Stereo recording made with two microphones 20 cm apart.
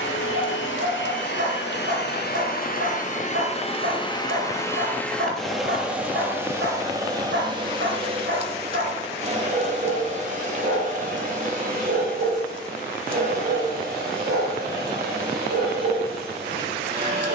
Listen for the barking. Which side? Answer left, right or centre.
right.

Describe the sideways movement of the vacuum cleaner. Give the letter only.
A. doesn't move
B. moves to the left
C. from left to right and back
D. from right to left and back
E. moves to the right
E.